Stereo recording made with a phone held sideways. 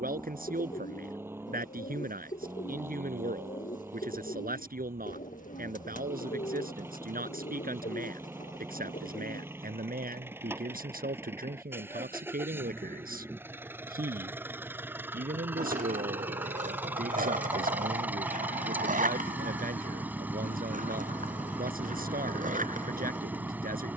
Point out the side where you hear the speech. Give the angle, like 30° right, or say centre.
80° right.